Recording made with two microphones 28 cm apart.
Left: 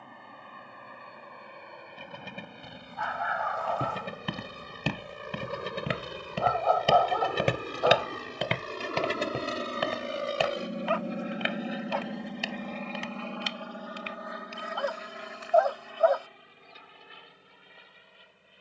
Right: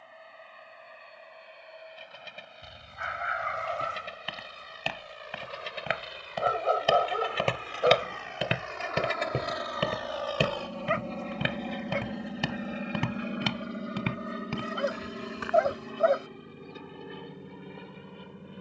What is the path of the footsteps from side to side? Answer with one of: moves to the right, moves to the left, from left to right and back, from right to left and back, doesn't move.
moves to the right.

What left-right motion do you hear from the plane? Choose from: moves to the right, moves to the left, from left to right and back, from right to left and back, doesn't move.
moves to the right.